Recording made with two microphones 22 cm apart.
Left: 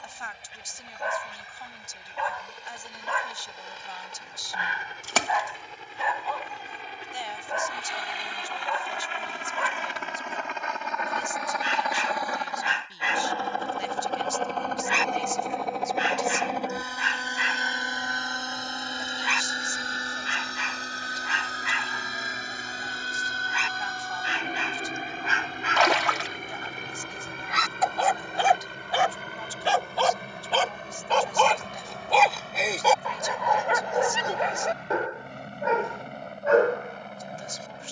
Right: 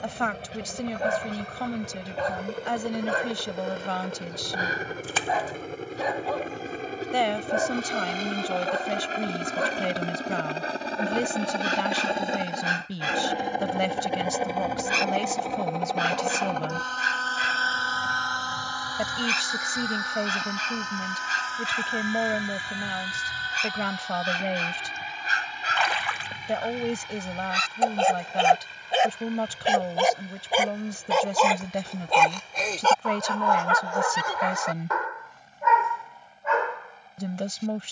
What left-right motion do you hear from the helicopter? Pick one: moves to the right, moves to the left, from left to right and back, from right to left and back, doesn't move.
moves to the left.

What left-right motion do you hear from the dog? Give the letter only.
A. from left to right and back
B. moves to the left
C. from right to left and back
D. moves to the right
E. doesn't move
B.